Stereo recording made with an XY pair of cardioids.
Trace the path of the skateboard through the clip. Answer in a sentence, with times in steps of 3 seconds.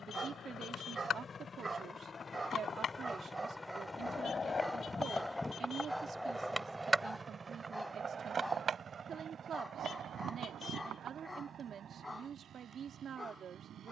You can hear the skateboard on the left from 0 s, on the right from 6 s and not at all from 12 s.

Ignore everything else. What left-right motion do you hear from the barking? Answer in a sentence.
You can hear the barking move from right to left.